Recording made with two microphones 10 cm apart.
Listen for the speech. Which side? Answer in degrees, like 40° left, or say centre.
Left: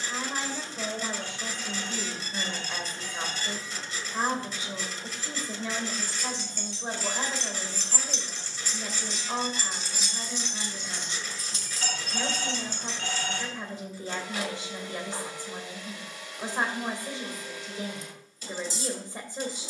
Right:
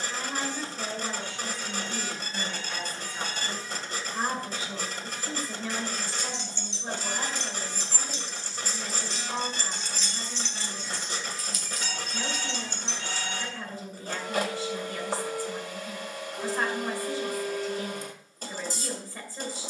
20° left.